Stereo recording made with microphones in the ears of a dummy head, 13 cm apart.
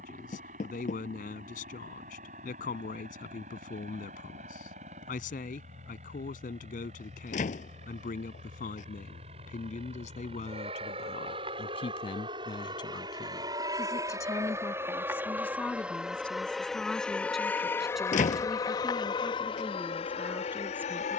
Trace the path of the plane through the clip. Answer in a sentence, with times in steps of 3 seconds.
You can hear the plane on the right from 0 s, in the centre from 15 s and on the left from 18 s.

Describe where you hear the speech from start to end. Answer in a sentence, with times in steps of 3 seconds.
In this clip you hear the speech on the left from 0 s and in the centre from 15 s.